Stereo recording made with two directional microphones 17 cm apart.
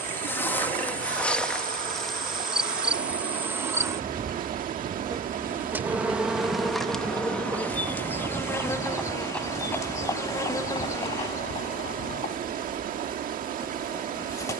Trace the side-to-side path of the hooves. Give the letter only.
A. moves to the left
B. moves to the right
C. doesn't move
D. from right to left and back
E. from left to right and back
A.